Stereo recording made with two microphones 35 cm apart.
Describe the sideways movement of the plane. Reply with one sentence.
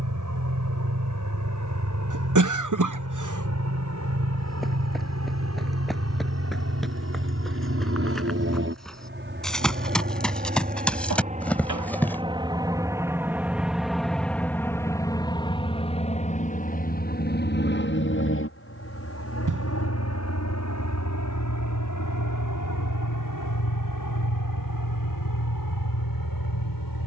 You can hear the plane go from the right side to the left.